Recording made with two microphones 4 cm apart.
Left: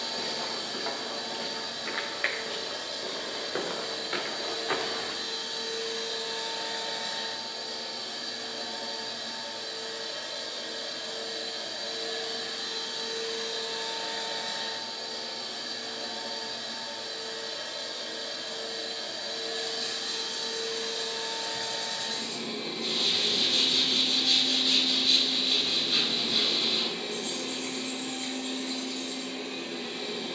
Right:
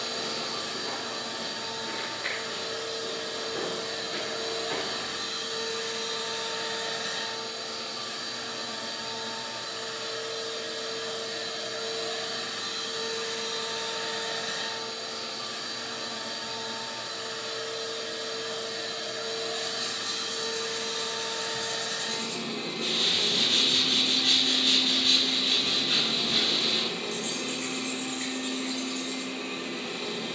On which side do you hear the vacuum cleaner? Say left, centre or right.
right.